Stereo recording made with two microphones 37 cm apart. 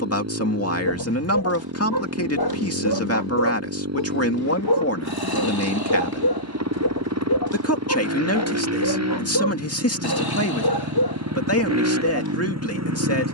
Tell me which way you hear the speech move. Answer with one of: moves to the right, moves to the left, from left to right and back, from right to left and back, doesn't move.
doesn't move.